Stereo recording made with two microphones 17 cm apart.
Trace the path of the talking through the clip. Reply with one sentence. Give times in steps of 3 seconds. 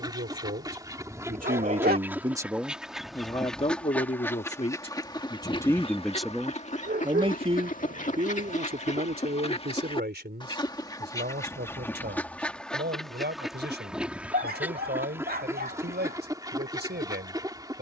You can hear the talking on the right from 0 s, on the left from 3 s and on the right from 6 s.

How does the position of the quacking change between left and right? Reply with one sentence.
You can hear the quacking move from right to left and back again.